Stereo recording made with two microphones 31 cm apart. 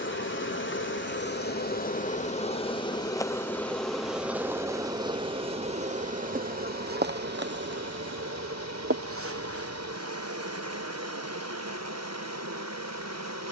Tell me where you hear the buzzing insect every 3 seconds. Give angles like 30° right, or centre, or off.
30° left, 10° right, 40° right, 50° right, 60° right.